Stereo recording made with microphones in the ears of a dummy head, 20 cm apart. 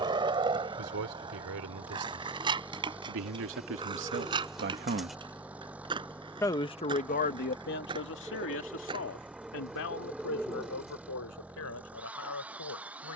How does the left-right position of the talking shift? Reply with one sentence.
You can hear the talking move from right to left.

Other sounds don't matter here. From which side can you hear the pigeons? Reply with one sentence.
You can hear the pigeons in the centre.